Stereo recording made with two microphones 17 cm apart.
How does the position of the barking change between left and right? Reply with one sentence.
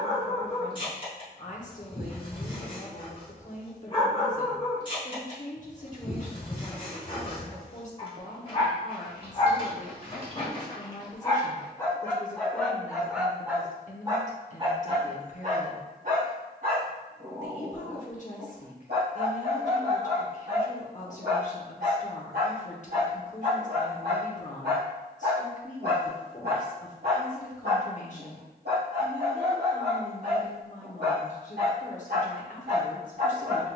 You can hear the barking go from the left side to the right.